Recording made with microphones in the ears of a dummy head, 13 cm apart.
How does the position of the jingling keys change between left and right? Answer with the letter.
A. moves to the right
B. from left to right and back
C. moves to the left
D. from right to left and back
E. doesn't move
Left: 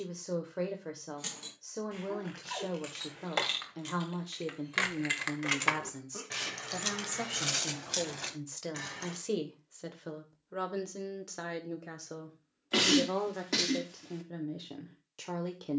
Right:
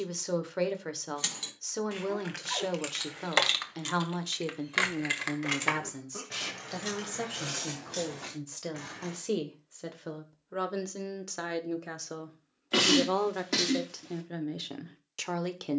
C.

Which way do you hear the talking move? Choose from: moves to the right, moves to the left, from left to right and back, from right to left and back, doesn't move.
from right to left and back.